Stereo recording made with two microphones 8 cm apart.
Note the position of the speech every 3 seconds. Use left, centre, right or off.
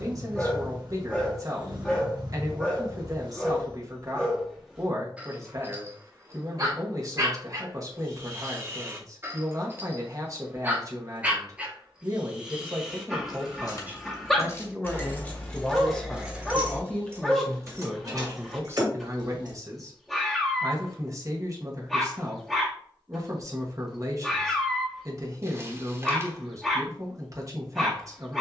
right, right, right, right, right, centre, right, right, right, right.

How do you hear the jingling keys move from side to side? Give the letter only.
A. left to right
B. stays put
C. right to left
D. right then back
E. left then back
A.